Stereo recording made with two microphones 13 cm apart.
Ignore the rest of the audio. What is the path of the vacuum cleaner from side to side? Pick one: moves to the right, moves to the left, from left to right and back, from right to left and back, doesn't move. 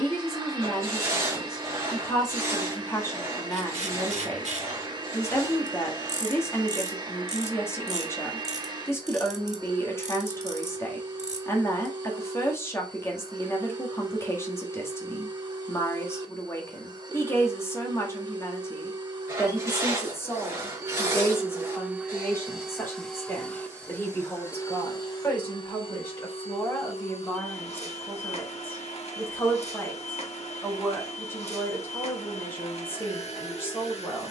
moves to the left.